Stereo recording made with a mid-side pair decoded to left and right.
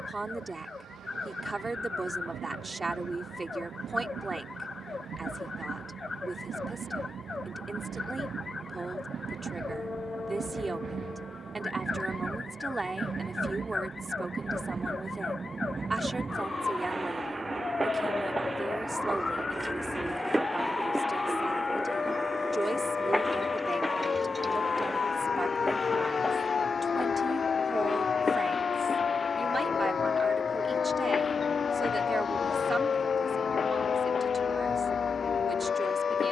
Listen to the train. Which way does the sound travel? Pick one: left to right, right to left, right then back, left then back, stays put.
right to left.